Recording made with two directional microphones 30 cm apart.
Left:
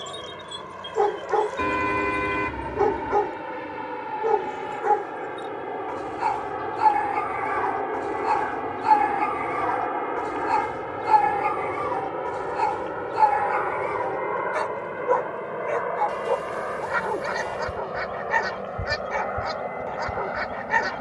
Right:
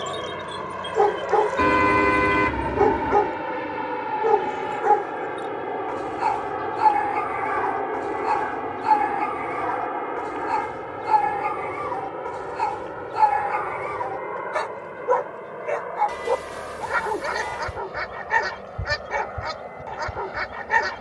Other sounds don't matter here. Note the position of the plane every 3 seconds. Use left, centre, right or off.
right, right, centre, centre, left, left, left.